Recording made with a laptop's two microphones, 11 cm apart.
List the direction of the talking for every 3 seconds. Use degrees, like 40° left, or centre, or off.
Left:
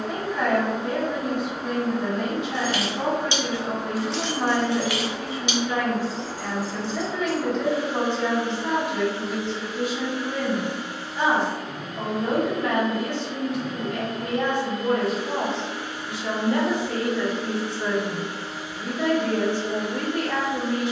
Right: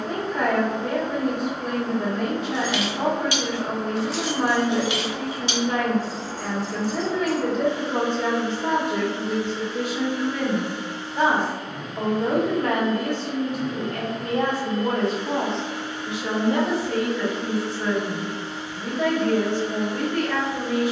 50° right, 50° right, 50° right, 50° right, 40° right, 10° right, 20° left.